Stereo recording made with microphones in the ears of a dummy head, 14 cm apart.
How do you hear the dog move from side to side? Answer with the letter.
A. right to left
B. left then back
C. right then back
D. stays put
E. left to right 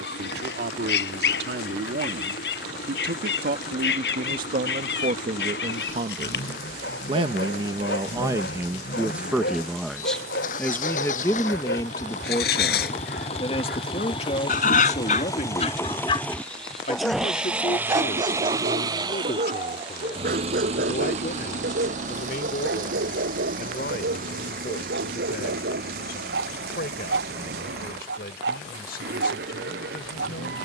E.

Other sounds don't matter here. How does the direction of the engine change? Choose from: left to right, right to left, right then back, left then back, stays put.
left to right.